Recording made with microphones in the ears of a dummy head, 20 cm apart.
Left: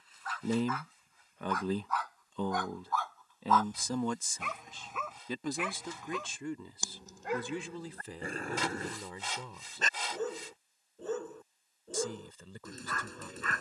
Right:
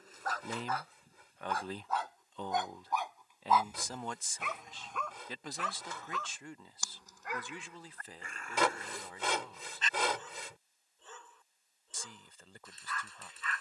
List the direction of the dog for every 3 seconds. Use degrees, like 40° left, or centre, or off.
30° right, centre, 30° left, 40° left, 40° left.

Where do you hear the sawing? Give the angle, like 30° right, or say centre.
60° right.